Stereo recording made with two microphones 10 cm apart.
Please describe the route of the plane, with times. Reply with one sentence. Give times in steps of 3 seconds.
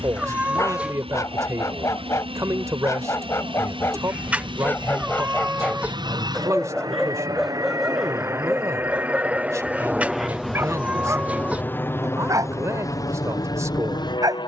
You can hear the plane on the right from 0 s, in the centre from 9 s and on the left from 12 s.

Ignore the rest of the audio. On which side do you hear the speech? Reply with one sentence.
In this clip you hear the speech on the right.